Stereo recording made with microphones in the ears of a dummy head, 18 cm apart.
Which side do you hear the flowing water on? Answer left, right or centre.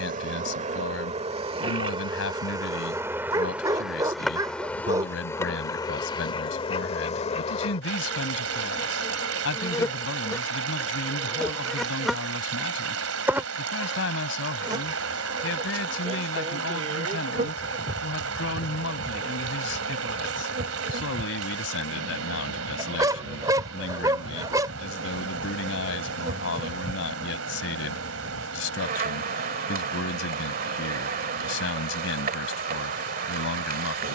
right.